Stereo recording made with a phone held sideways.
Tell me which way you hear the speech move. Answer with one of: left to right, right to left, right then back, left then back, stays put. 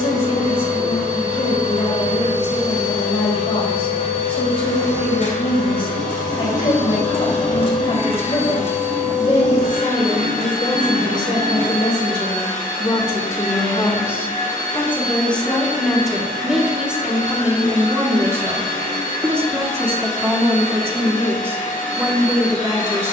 left to right.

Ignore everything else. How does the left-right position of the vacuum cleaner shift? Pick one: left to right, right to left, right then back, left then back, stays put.
stays put.